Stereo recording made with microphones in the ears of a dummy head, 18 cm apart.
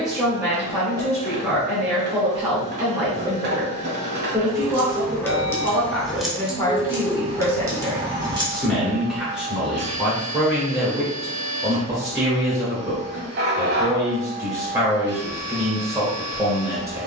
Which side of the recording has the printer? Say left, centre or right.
right.